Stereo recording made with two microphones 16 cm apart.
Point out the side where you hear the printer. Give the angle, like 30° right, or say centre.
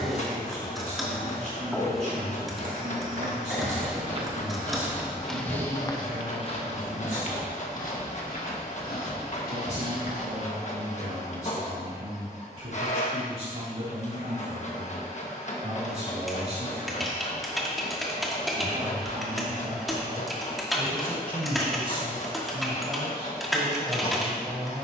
50° left.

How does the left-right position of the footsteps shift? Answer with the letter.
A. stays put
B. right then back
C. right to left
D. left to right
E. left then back
C.